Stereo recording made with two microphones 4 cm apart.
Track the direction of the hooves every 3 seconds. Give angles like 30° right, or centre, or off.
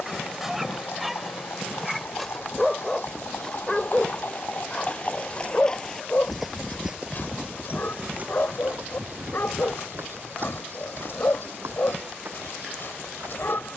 70° left, 40° left, 30° right, 60° right, 70° right.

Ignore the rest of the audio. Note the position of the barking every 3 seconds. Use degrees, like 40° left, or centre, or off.
centre, 20° left, 50° left, 60° left, 60° left.